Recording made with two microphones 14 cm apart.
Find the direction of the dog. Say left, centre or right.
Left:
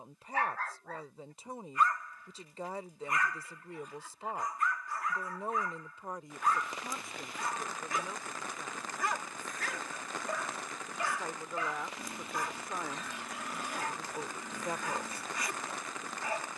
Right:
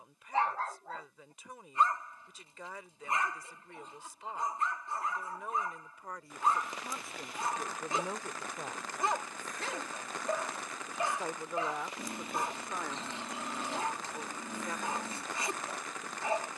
right.